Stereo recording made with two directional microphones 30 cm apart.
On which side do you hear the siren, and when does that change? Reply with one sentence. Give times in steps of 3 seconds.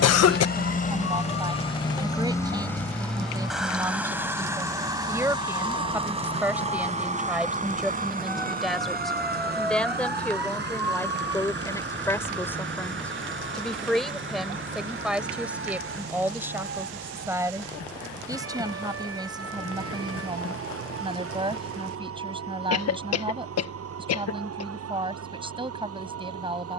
In this clip you hear the siren on the left from 0 s, in the centre from 6 s and on the right from 12 s.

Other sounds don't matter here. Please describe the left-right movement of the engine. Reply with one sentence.
You can hear the engine move from left to right.